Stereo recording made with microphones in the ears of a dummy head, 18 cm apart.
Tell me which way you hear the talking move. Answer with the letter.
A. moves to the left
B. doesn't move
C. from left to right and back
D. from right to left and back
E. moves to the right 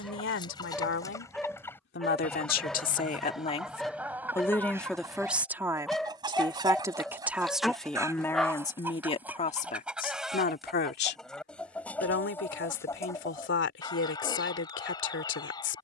C.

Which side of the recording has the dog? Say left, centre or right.
centre.